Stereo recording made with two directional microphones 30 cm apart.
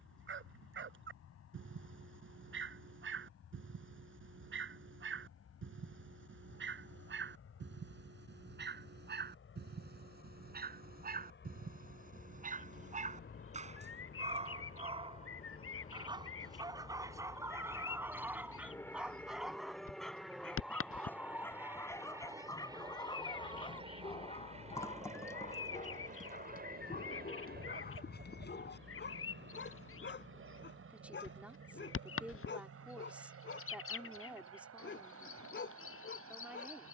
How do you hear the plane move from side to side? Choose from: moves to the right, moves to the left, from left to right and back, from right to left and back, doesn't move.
moves to the right.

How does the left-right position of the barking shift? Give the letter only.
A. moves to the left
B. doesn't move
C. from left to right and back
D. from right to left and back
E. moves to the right
A.